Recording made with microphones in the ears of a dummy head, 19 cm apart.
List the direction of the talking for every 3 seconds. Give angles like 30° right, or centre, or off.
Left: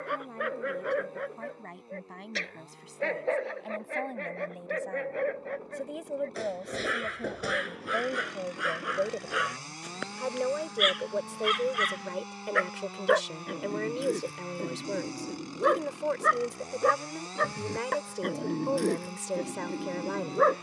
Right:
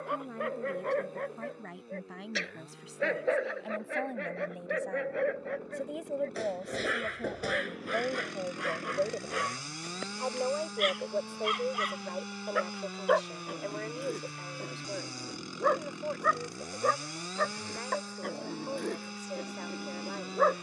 10° right, centre, 10° left, 30° left, 50° left, 70° left, 70° left.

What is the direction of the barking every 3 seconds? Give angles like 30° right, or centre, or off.
10° left, 10° right, centre, 20° left, 30° left, 40° left, 40° left.